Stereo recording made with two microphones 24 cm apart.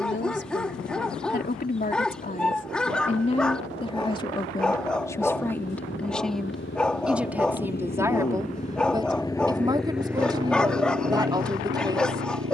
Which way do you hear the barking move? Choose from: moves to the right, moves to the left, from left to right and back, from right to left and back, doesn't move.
doesn't move.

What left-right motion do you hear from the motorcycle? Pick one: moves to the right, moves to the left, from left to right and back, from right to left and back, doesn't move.
moves to the right.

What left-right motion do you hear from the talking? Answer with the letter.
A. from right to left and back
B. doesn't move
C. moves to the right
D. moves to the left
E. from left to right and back
C.